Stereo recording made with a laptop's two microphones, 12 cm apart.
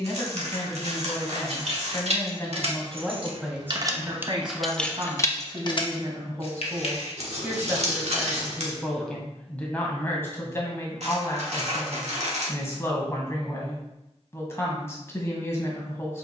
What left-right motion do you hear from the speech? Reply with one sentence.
You can hear the speech go right and come back.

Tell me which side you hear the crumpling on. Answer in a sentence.
In this clip you hear the crumpling on the right.